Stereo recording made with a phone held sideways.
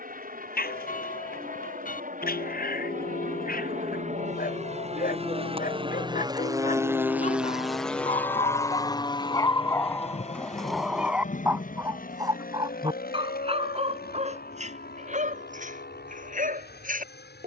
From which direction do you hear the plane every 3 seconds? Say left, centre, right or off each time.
right, right, centre, left, left, left.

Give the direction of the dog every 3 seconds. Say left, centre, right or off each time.
left, left, left, centre, right, right.